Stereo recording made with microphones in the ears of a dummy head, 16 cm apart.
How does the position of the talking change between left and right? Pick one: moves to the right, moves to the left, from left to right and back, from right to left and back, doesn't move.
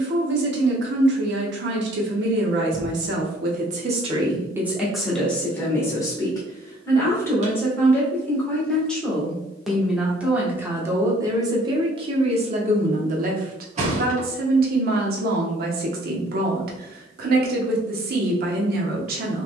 from right to left and back.